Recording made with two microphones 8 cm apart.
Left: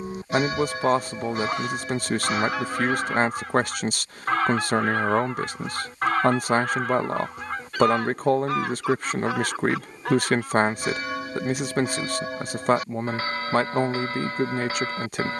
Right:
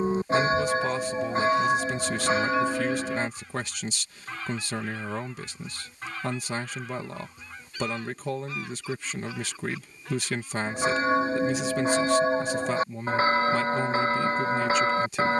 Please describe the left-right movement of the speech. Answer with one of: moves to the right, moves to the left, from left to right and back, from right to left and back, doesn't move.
doesn't move.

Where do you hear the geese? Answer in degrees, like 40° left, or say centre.
70° left.